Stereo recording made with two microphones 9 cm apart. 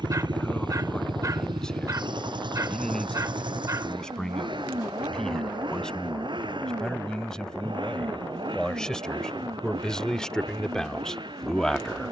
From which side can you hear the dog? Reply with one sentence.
You can hear the dog on the right.